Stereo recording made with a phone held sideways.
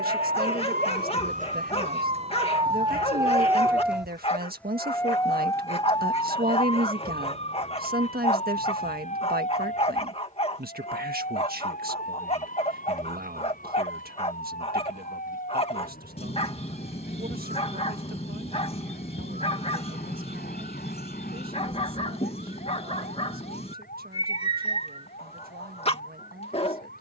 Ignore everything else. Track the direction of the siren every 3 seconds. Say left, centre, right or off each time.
right, centre, left, left, left, left, left, left, left.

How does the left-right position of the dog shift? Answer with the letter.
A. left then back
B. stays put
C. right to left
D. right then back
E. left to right
B.